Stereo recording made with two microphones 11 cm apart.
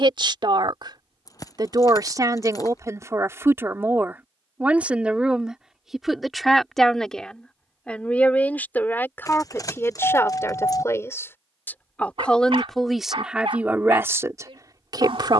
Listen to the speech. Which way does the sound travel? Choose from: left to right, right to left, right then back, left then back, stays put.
left then back.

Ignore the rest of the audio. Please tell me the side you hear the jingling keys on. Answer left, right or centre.
left.